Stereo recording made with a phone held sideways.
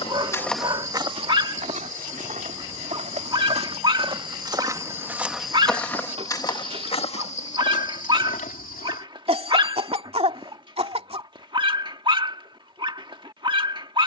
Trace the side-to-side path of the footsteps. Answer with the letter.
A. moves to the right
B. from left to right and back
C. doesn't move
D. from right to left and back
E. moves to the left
B.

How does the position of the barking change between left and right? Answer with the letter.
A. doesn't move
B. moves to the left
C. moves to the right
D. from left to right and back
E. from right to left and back
A.